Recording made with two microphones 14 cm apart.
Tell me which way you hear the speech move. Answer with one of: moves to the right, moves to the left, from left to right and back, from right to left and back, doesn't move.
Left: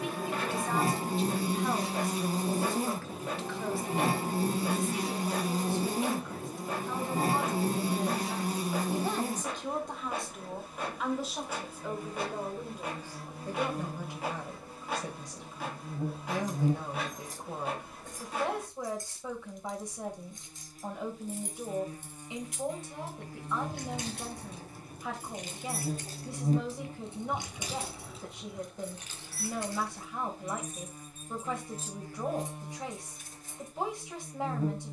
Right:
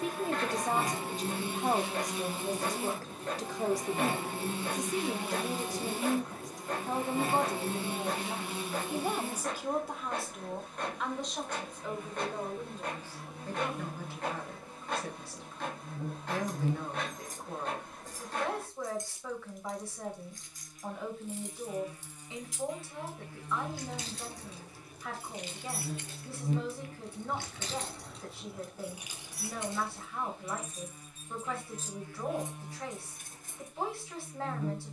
moves to the left.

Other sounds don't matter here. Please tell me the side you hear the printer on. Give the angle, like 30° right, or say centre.
10° left.